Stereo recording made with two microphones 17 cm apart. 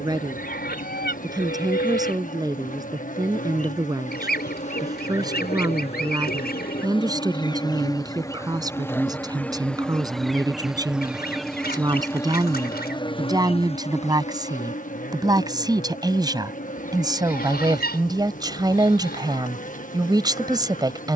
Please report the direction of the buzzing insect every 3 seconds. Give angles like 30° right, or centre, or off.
50° left, 40° left, 20° left, centre, 30° left, 50° left, 50° left.